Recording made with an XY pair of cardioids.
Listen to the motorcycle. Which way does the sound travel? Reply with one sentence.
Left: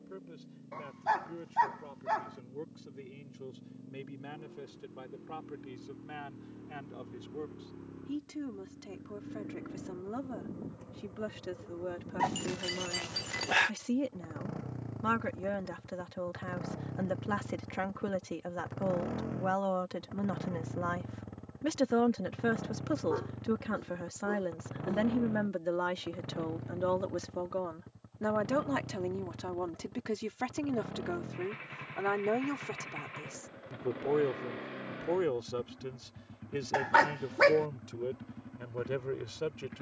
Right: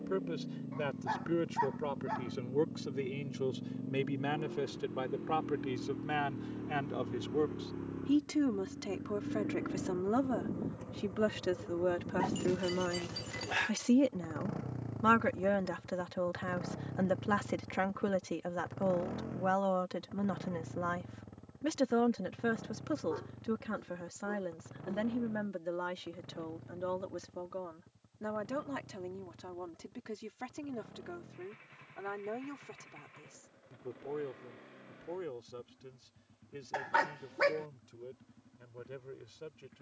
In this clip you hear the motorcycle move from right to left.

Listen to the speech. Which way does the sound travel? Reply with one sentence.
In this clip you hear the speech move from right to left.